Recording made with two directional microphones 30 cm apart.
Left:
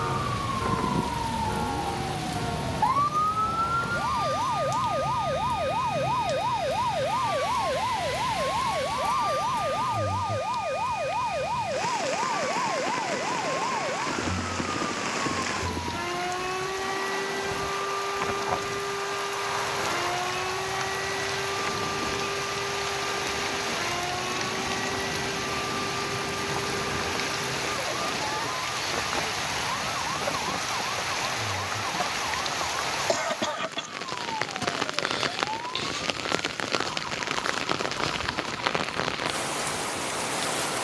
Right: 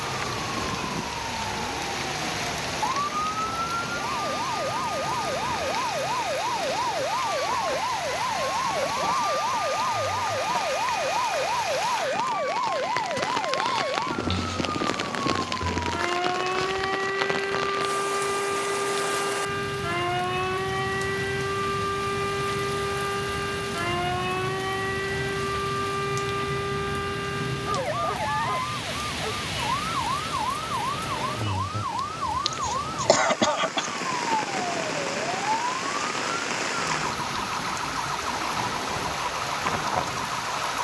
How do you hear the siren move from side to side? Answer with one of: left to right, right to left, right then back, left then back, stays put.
left to right.